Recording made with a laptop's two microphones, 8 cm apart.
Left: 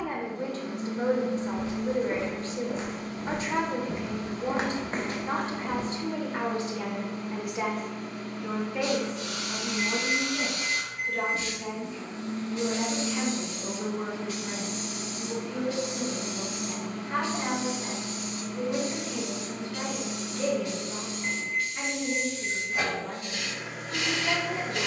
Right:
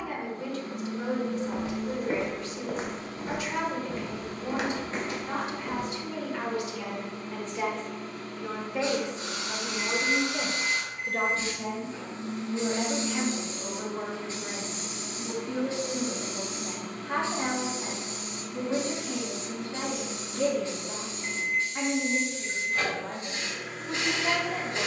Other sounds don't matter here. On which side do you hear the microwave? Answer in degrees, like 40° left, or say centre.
10° left.